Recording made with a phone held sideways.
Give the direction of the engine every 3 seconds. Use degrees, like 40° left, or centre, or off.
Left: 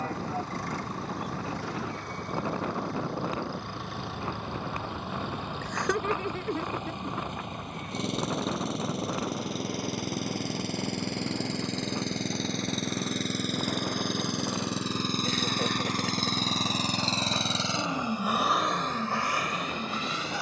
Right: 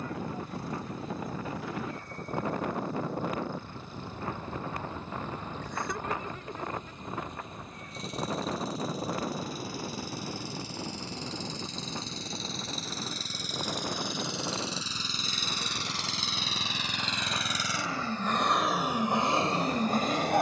70° left, 70° left, 70° left, 60° left, 60° left, 40° left, 20° right.